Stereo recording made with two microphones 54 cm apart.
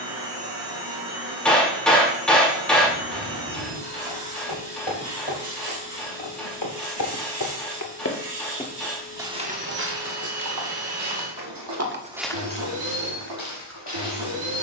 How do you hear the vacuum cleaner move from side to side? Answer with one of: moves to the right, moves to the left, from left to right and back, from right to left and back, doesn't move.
doesn't move.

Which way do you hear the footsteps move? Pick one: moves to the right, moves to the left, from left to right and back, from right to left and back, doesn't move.
from left to right and back.